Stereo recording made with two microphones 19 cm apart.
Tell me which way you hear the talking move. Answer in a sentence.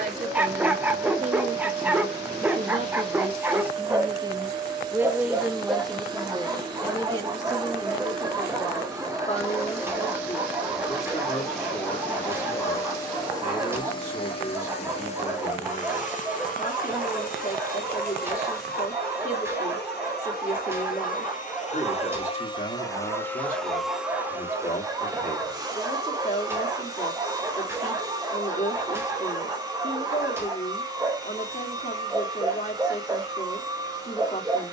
In this clip you hear the talking travel towards the left.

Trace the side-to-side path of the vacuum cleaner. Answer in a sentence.
You can hear the vacuum cleaner go left and come back.